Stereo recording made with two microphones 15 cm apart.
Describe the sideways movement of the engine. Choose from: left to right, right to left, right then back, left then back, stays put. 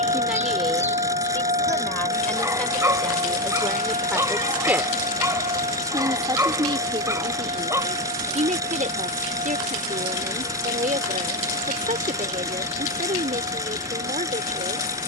stays put.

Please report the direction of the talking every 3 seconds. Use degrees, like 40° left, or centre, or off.
10° left, centre, 40° right, 60° right, 60° right.